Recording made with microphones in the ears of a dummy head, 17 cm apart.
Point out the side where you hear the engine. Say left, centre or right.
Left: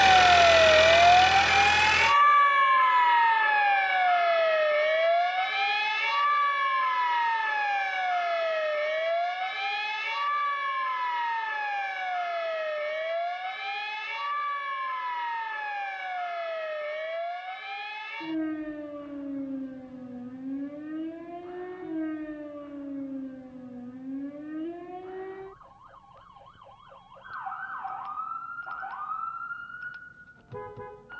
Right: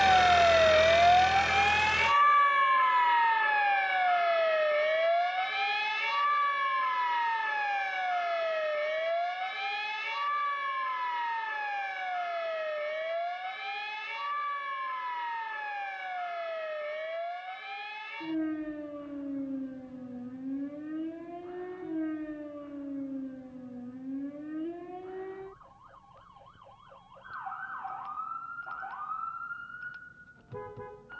left.